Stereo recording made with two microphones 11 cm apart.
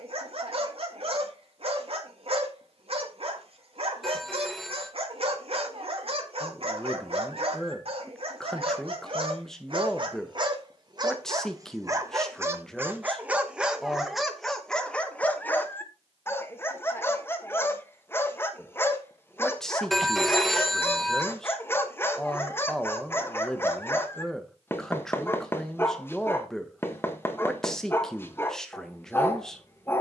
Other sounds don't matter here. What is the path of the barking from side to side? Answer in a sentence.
You can hear the barking move to the left.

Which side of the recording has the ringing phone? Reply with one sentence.
You can hear the ringing phone in the centre.